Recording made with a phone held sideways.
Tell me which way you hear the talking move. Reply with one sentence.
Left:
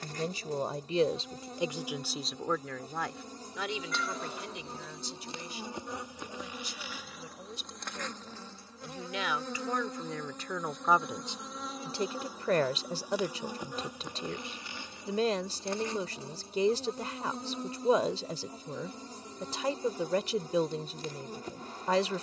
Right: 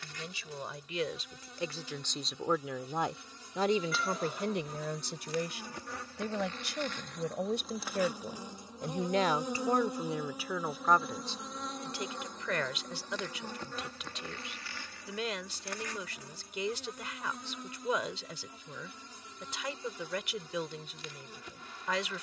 In this clip you hear the talking go right and come back.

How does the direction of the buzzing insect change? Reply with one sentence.
In this clip you hear the buzzing insect move from left to right and back again.